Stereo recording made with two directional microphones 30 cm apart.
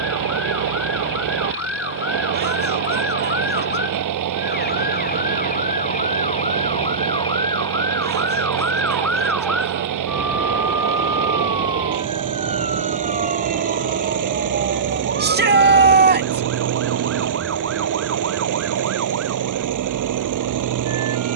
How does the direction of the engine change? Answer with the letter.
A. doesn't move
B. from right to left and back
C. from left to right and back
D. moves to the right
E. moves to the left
A.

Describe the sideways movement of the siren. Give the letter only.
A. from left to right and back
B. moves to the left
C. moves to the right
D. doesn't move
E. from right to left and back
C.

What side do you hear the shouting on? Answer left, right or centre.
right.